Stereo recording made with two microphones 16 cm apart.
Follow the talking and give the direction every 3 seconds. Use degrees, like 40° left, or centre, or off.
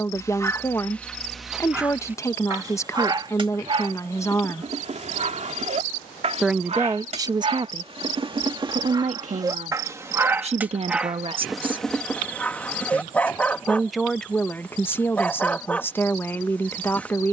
20° left, 20° left, 30° right, 50° right, centre, 10° left.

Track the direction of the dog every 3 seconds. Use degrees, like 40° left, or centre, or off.
centre, 40° right, 40° right, 10° right, 10° left, 10° left.